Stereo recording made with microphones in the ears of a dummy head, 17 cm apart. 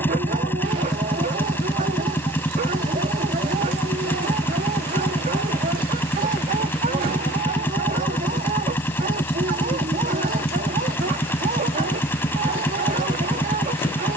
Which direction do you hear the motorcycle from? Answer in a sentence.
You can hear the motorcycle in the centre.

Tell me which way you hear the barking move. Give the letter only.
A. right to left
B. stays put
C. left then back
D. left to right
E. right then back
B.